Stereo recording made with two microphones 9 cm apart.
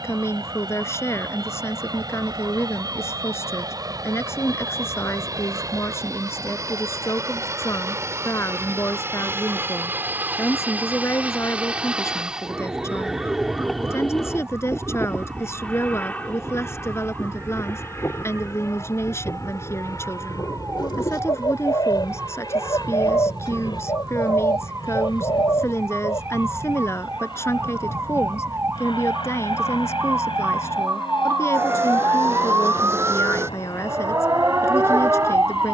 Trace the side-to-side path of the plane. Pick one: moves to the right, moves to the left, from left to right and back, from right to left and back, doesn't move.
moves to the left.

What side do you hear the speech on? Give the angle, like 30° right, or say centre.
30° left.